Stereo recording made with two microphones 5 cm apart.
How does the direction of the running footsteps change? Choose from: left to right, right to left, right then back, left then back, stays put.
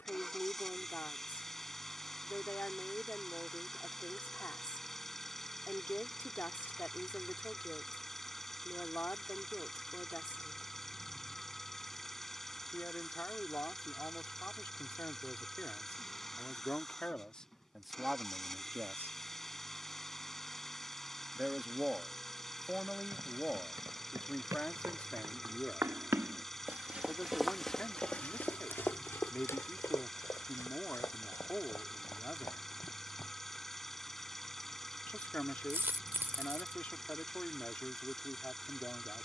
right to left.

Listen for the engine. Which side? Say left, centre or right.
centre.